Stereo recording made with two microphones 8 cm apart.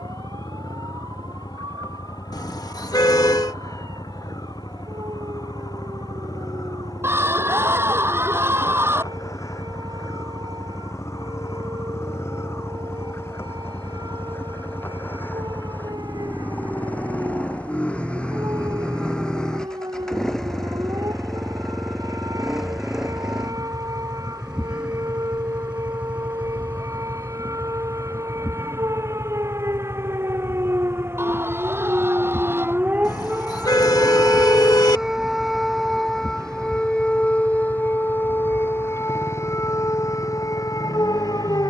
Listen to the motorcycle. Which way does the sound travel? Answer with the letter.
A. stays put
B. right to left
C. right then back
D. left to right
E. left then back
D.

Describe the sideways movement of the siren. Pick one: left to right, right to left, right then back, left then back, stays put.
right to left.